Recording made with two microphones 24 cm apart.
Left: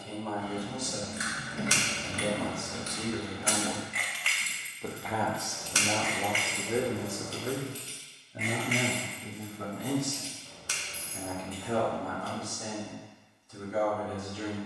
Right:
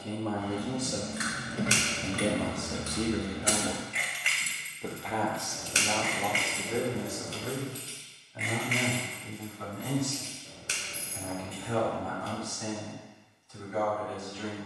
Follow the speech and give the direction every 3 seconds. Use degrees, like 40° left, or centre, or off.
50° right, 10° right, 30° left, 40° left, 50° left.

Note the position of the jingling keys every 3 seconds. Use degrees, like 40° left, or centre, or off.
70° right, 10° right, 50° left, 60° left, off.